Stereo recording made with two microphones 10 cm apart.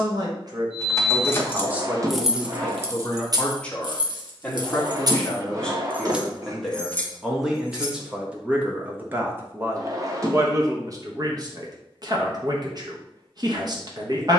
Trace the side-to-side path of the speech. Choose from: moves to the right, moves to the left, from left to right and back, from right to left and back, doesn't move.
from right to left and back.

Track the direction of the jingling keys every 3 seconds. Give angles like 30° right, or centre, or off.
10° left, 50° right, 10° left, off, off.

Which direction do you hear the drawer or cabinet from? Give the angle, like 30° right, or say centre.
40° right.